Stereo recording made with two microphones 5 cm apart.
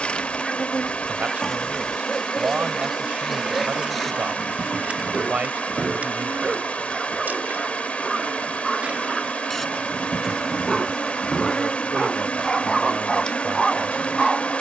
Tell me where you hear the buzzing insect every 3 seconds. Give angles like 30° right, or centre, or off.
10° left, 20° right, 30° right, centre, 20° left.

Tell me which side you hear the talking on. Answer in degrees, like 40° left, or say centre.
40° right.